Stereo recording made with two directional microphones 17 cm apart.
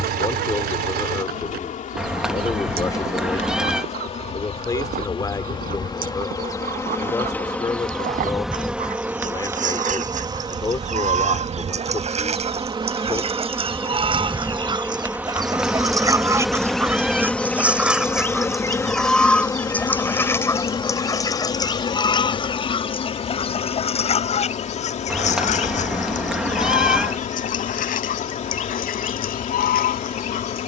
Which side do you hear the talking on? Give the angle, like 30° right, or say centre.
20° left.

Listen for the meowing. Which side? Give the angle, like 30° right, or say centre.
centre.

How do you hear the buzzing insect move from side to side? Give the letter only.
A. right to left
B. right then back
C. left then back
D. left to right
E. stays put
B.